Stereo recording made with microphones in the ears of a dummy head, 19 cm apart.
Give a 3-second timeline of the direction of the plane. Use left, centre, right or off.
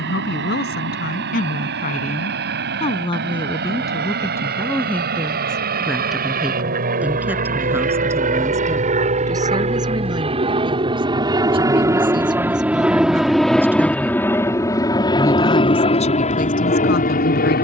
right, right, right, right, centre, left.